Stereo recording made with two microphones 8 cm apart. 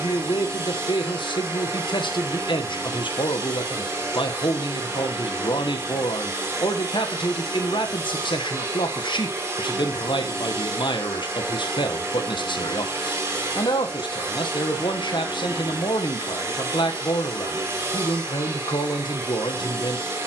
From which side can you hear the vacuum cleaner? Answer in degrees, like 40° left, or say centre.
30° right.